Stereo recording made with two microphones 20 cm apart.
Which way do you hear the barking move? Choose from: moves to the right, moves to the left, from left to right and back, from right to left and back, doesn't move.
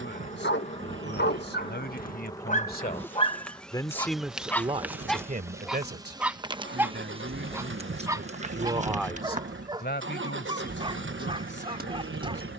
moves to the right.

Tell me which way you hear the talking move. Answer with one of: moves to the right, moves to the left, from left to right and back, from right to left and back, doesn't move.
from left to right and back.